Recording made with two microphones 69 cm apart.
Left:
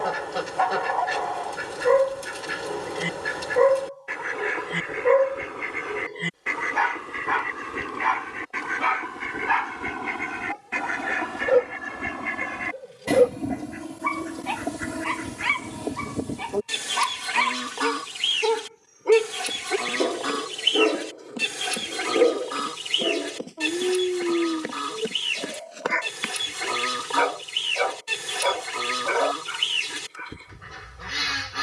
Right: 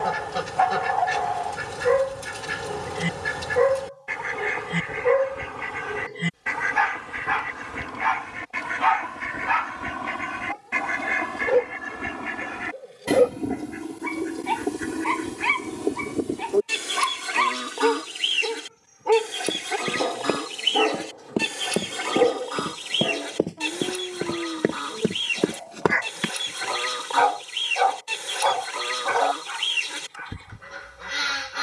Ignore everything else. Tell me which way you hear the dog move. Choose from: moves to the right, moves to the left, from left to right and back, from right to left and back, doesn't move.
from right to left and back.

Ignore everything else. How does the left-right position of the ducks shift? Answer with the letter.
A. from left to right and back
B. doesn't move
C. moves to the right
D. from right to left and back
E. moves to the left
E.